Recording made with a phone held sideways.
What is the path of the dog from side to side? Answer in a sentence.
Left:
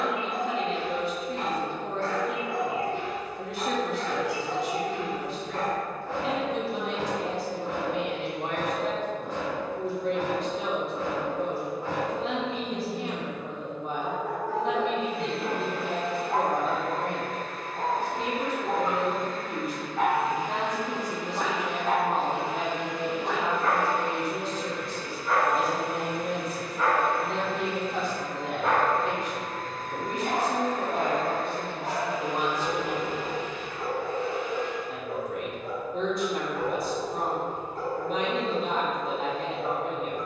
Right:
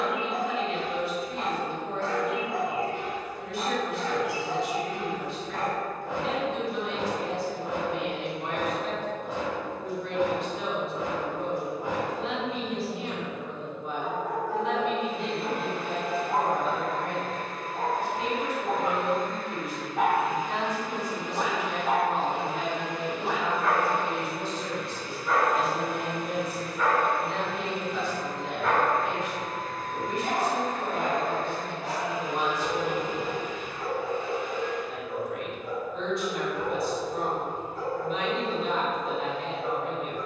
You can hear the dog travel towards the left.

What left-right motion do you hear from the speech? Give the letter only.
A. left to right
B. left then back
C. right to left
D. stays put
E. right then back
D.